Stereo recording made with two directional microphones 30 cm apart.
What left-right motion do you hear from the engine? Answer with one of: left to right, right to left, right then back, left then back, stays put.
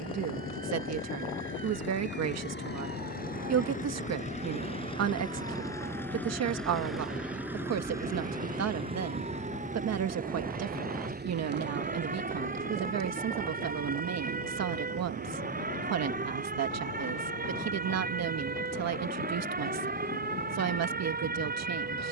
left to right.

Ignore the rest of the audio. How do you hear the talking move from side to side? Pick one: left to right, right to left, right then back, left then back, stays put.
stays put.